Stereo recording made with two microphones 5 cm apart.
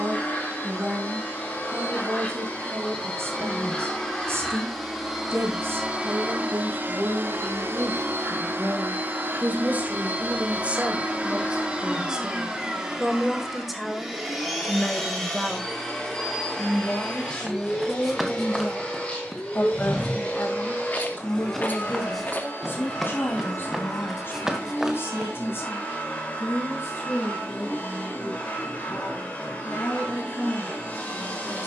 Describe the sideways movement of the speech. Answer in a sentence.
You can hear the speech move to the left.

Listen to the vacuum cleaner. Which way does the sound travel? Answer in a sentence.
You can hear the vacuum cleaner go right and come back.